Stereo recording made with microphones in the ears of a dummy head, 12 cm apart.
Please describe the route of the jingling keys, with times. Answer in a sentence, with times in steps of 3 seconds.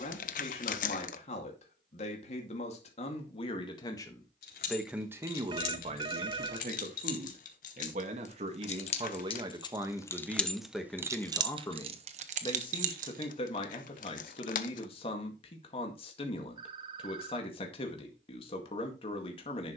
You can hear the jingling keys not at all from 0 s, on the left from 3 s, in the centre from 9 s, on the right from 12 s and not at all from 15 s.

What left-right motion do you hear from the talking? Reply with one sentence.
You can hear the talking move from left to right and back again.